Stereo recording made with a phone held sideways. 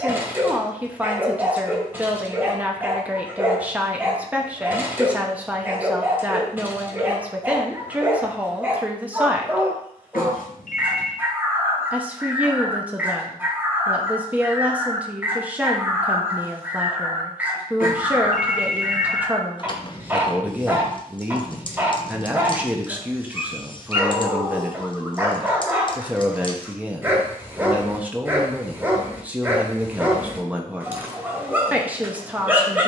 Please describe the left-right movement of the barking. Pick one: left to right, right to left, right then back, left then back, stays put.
stays put.